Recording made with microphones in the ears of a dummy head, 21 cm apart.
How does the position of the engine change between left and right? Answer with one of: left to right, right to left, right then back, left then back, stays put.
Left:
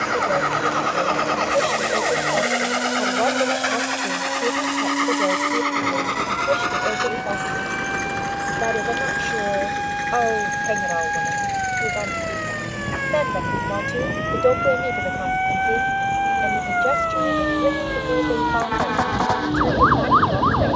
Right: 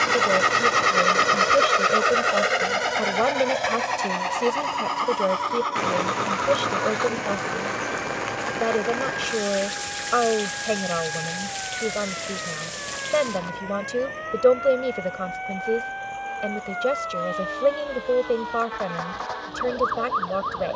right to left.